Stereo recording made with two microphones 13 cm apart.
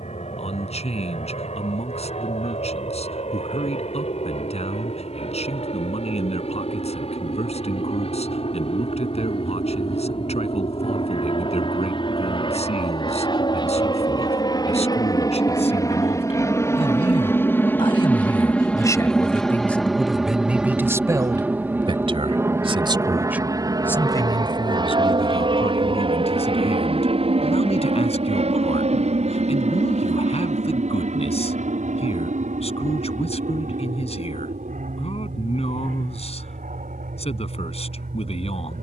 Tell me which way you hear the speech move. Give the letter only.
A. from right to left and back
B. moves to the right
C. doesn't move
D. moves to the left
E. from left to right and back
E.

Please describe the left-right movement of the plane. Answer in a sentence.
You can hear the plane go from the left side to the right.